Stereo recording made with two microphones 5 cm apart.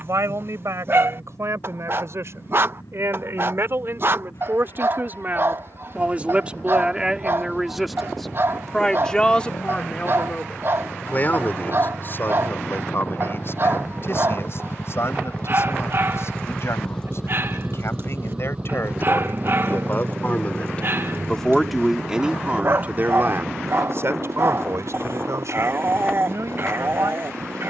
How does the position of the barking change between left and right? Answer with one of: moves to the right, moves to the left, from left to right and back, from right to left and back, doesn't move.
doesn't move.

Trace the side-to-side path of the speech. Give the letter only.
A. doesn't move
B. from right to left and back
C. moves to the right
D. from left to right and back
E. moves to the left
B.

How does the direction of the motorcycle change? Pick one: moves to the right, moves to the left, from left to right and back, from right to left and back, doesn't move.
moves to the right.